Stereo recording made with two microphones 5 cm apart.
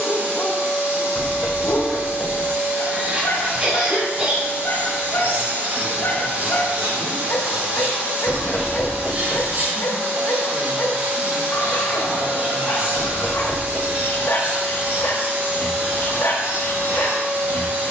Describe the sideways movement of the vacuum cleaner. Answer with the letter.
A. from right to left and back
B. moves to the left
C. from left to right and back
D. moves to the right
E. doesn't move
E.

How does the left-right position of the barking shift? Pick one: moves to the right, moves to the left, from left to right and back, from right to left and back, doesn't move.
doesn't move.